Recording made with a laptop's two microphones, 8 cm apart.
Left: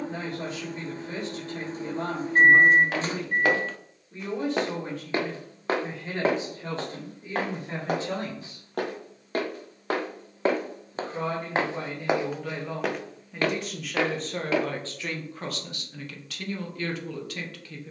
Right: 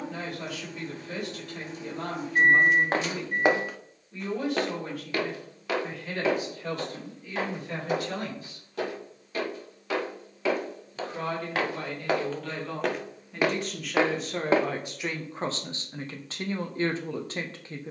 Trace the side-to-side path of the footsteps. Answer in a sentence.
You can hear the footsteps move from right to left and back again.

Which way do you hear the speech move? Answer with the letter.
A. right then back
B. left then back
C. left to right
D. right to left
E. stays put
C.